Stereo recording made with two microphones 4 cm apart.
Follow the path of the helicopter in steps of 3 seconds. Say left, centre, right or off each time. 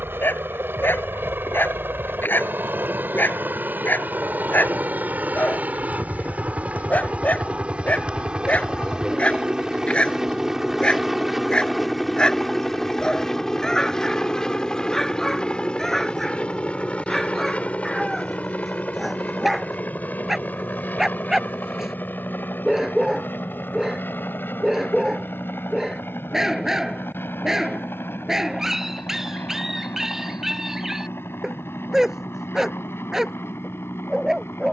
right, right, right, centre, centre, left, left, left, left, left, left, left.